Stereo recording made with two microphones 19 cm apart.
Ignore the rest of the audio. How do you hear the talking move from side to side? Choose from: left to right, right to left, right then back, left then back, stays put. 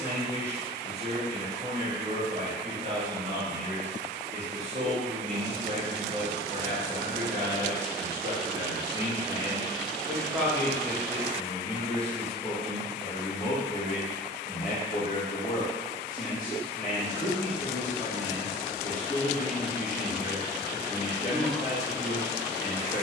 right to left.